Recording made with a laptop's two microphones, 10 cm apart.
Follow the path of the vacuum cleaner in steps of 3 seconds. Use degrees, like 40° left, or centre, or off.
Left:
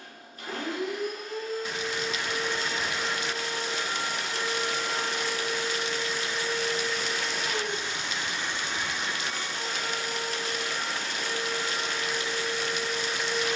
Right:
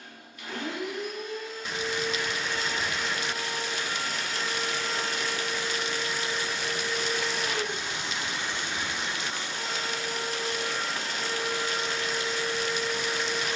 40° left, 20° left, 10° right, 30° right, 30° right.